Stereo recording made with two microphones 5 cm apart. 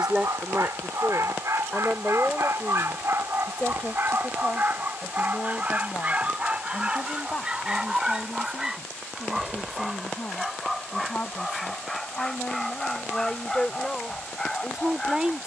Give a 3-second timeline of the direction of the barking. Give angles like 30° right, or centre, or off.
70° right, 40° right, 20° right, centre, 10° left.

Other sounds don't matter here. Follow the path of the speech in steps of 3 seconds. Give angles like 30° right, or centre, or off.
centre, 20° left, 30° left, 40° left, 10° left.